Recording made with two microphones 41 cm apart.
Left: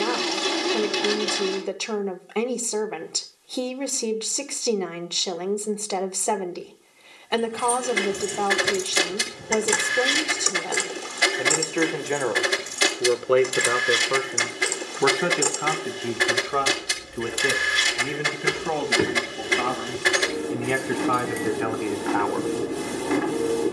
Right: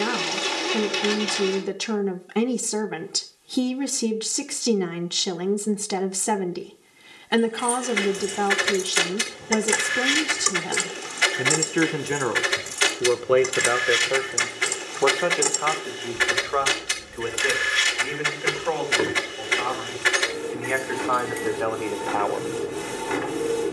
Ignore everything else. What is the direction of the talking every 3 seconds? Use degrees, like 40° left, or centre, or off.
30° right, 30° right, 30° right, 30° right, centre, 40° left, 50° left, 30° left.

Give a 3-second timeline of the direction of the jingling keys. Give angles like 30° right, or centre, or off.
off, off, 50° left, 10° right, 60° right, 10° right, 40° left, 60° left.